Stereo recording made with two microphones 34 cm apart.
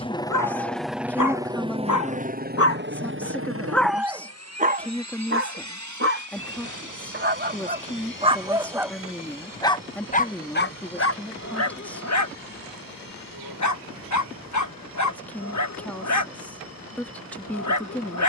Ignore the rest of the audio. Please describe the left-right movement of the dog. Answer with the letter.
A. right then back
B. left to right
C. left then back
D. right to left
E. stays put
A.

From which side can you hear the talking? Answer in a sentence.
In this clip you hear the talking in the centre.